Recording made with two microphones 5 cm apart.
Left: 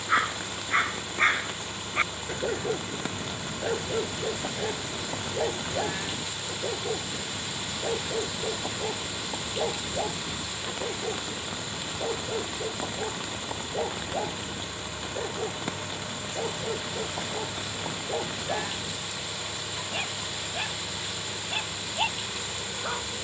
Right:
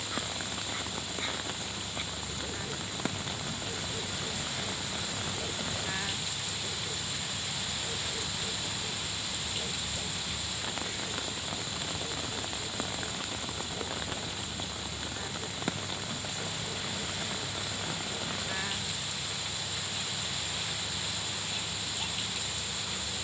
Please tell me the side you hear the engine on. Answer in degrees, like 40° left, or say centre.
50° left.